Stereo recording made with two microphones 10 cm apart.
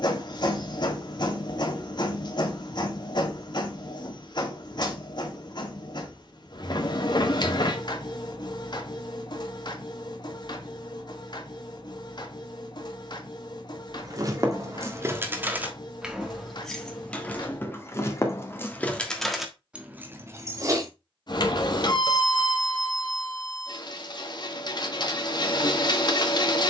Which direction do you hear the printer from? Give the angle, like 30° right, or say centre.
50° left.